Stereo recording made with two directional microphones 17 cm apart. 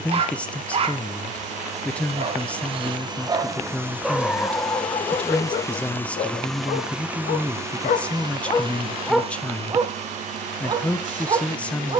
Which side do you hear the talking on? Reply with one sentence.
You can hear the talking in the centre.